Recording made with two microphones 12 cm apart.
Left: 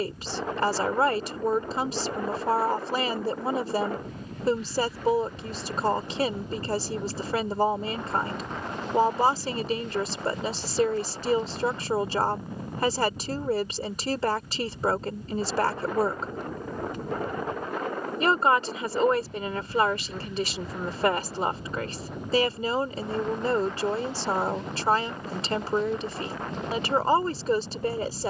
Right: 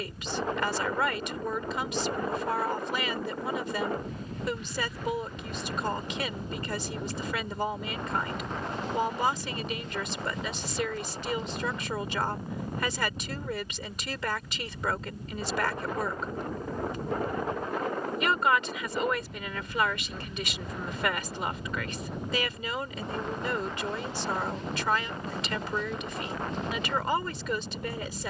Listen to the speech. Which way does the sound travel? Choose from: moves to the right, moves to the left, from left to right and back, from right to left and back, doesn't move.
doesn't move.